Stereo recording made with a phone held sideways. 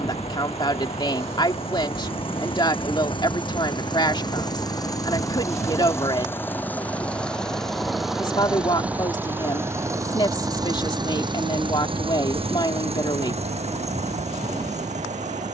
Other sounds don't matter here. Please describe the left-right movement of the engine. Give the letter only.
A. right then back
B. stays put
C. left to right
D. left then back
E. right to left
C.